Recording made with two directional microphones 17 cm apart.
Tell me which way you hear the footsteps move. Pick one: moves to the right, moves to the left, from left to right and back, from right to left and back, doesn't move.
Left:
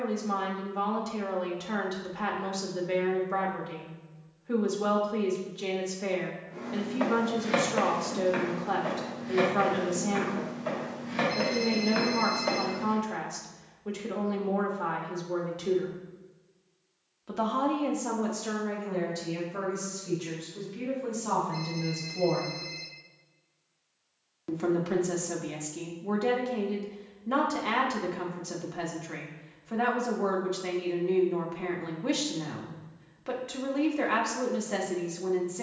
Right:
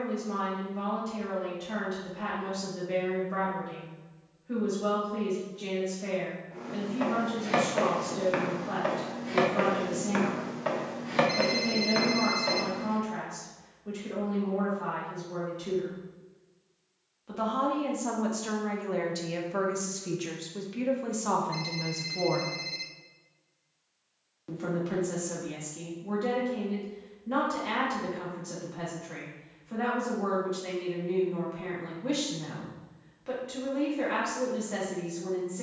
from left to right and back.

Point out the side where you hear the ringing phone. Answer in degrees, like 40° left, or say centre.
30° right.